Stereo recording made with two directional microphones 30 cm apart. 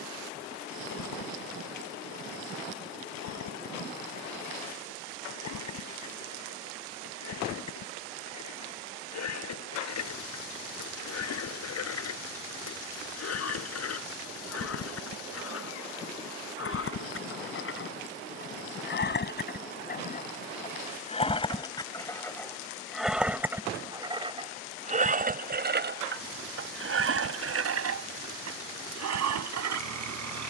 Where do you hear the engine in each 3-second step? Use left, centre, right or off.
left, left, left, left, left, left, left, centre, right, right.